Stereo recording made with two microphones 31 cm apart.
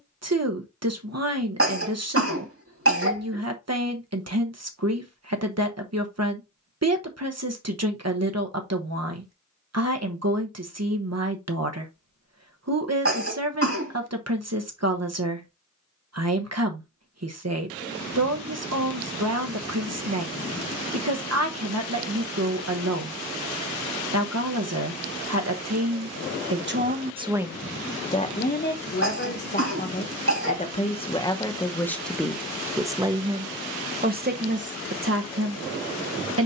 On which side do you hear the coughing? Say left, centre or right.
right.